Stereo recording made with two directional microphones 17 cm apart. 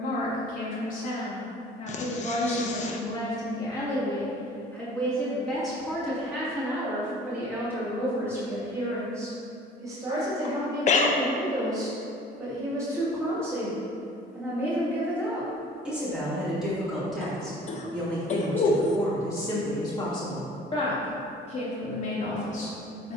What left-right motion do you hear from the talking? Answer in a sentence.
In this clip you hear the talking go right and come back.